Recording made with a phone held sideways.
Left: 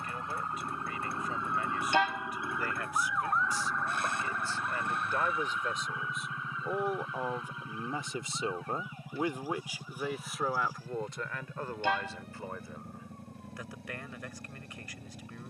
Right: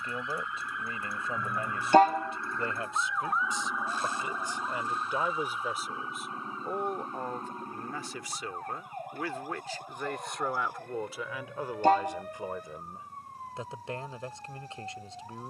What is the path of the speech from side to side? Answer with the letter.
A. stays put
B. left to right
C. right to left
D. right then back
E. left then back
E.